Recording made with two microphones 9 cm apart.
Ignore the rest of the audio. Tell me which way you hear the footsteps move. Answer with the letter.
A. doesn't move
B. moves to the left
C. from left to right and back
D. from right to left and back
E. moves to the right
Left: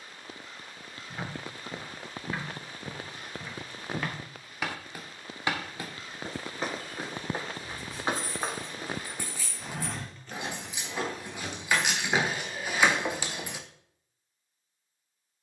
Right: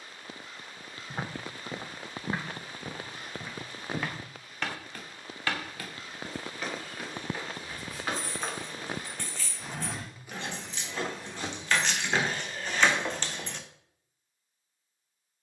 D.